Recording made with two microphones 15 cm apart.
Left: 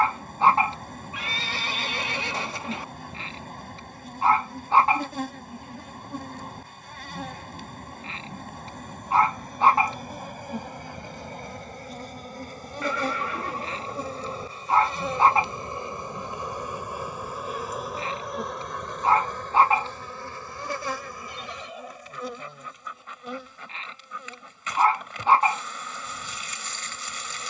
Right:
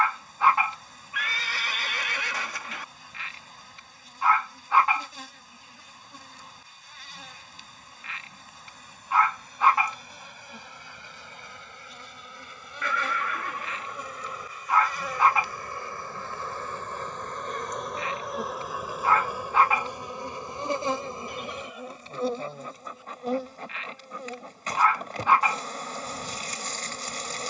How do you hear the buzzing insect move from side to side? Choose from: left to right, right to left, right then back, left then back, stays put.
left to right.